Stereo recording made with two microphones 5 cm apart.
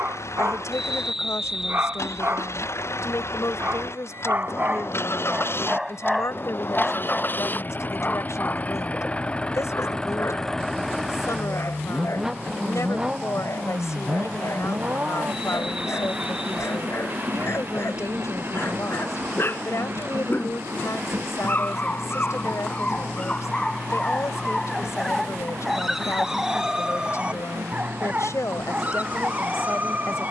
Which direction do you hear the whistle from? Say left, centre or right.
centre.